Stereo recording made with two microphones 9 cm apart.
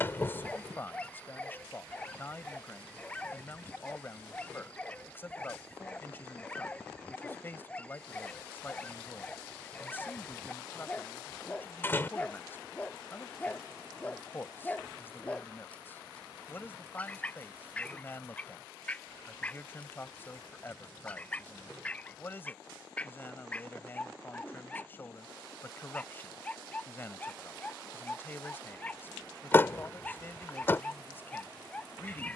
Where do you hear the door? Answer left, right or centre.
left.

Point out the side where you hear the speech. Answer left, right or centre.
left.